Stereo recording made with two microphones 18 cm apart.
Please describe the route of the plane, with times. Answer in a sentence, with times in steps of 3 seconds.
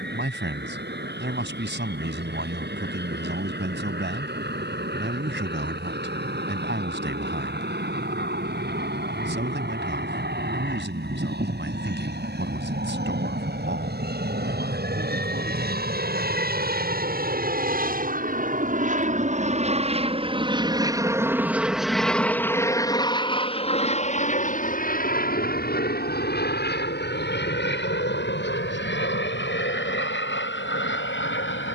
You can hear the plane on the right from 0 s, in the centre from 21 s and on the left from 24 s.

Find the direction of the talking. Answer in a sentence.
You can hear the talking on the right.